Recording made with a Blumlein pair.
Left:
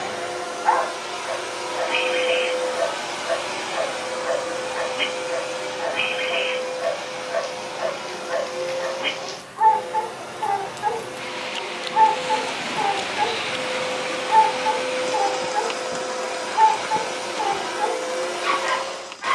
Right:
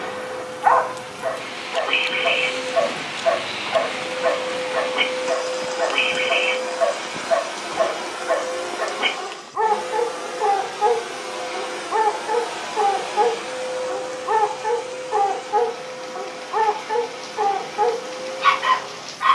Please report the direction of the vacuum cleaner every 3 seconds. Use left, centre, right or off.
left, centre, right, right, centre, left, left.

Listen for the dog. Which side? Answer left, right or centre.
right.